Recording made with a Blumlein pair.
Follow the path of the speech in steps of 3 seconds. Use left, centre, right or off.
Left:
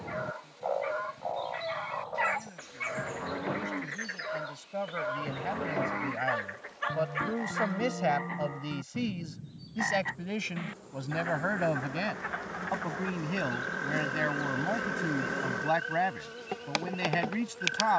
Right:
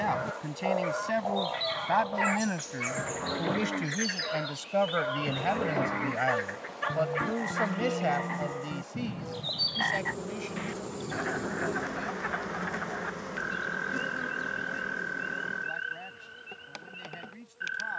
right, right, centre, left, left, left.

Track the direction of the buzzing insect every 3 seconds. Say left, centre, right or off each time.
right, right, right, right, centre, left.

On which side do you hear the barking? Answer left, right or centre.
centre.